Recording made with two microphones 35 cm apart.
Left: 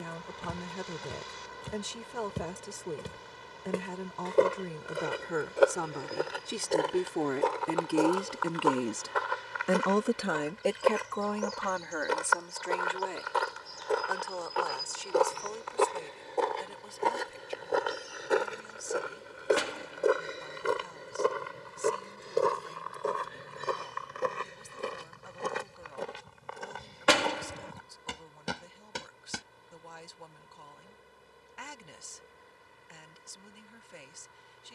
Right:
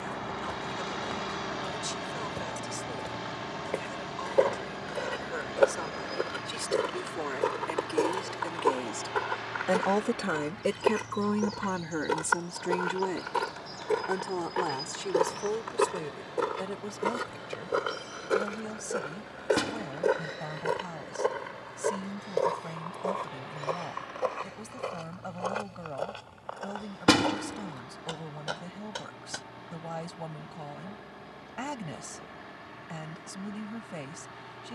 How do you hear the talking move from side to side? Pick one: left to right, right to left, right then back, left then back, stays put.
left to right.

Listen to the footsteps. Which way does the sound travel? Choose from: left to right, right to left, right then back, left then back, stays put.
right then back.